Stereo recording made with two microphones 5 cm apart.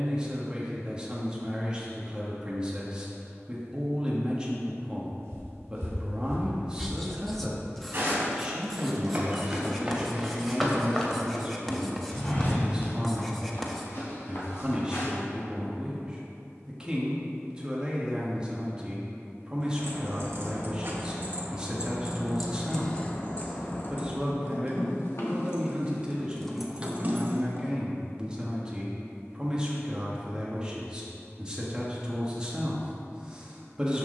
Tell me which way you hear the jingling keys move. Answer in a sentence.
In this clip you hear the jingling keys go left and come back.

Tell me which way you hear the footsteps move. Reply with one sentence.
You can hear the footsteps travel towards the left.